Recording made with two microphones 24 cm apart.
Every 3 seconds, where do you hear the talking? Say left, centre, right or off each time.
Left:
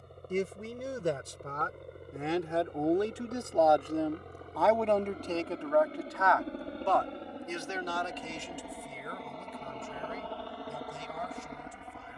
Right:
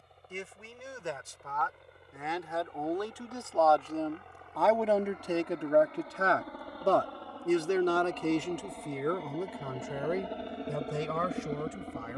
left, centre, right, right.